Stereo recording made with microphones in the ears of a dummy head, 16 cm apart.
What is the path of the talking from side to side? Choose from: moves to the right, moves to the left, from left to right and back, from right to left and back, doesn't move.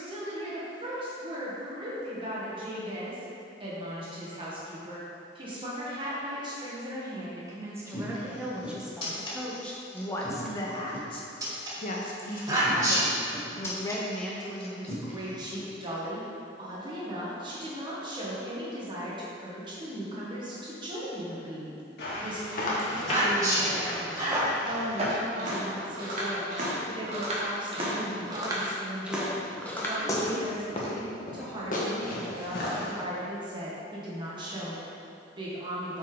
from right to left and back.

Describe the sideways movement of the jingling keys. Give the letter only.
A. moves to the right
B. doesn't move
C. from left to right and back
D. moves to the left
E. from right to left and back
C.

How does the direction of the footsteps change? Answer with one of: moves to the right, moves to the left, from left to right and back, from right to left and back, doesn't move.
from left to right and back.